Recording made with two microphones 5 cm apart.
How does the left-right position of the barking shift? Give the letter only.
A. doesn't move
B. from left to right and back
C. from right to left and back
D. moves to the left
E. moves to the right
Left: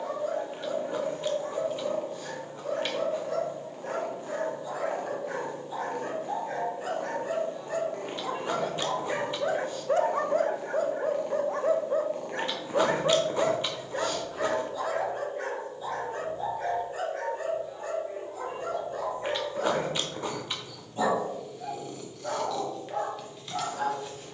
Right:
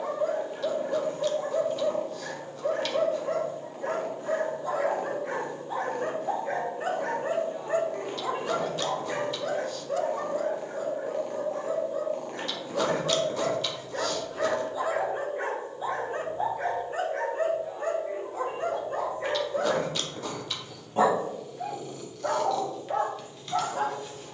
C.